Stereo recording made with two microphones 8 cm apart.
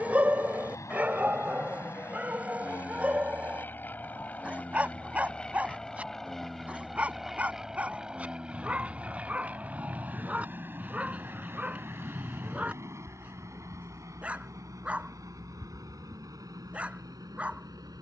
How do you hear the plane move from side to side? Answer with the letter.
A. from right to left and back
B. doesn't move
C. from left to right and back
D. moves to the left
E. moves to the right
E.